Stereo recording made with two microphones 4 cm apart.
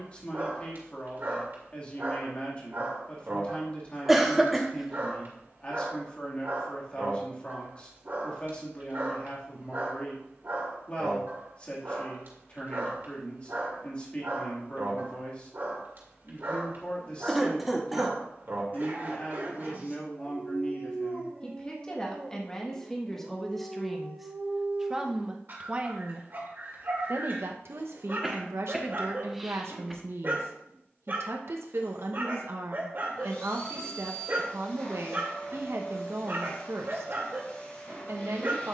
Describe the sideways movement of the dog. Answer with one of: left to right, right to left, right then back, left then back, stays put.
stays put.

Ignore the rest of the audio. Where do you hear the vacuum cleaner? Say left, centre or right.
left.